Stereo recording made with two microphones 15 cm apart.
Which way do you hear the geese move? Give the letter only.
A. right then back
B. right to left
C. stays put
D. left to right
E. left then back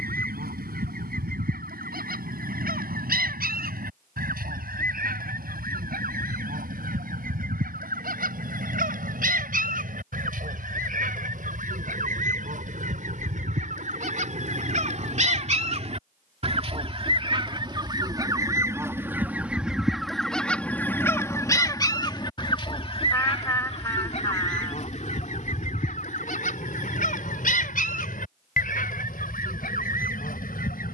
B.